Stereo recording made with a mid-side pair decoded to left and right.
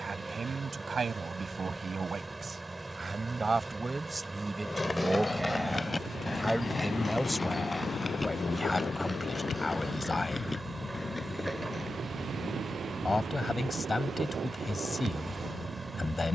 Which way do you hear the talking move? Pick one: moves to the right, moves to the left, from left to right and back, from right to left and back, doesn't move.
moves to the left.